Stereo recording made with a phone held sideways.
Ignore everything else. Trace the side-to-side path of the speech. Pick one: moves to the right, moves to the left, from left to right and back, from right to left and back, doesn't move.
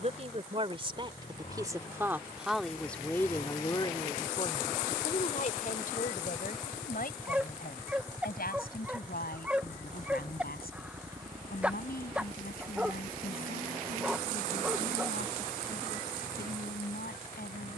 moves to the left.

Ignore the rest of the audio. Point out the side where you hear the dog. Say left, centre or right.
centre.